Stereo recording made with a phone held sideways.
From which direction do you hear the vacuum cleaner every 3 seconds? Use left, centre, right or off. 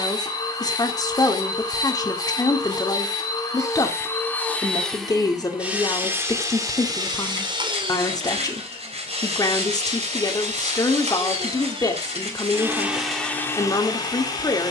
left, centre, right, right, centre.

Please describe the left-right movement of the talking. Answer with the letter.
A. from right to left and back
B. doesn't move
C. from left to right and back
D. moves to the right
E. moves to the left
B.